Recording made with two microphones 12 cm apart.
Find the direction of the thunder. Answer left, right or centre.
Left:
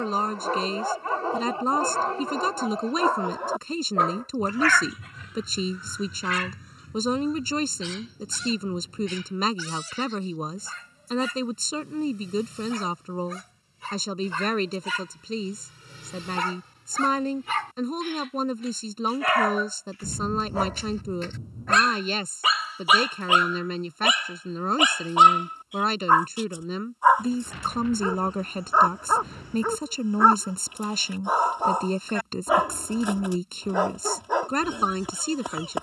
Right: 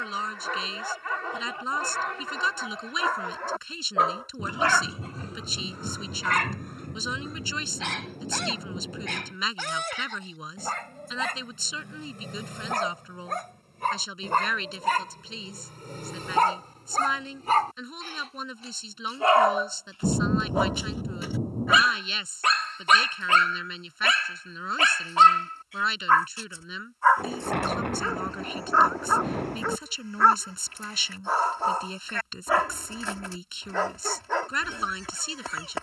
right.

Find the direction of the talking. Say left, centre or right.
left.